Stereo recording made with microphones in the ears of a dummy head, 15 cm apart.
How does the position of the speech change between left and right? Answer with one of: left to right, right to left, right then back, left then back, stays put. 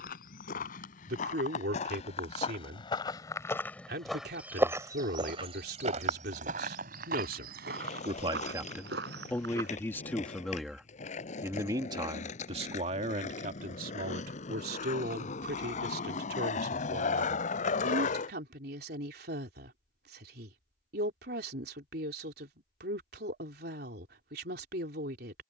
left then back.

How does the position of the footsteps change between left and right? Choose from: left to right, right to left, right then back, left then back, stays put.
left to right.